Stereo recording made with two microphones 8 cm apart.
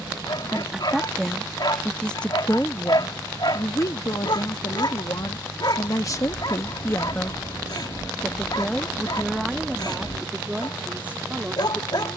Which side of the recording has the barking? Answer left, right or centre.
left.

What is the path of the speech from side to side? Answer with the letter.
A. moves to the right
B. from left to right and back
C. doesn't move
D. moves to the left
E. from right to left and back
E.